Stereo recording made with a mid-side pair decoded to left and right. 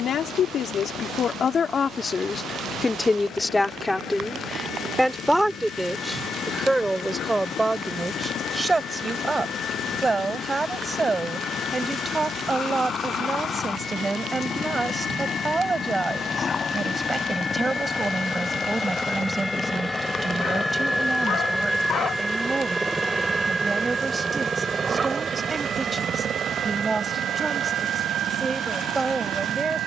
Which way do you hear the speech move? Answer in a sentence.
In this clip you hear the speech move to the right.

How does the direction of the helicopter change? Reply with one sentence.
You can hear the helicopter move from left to right.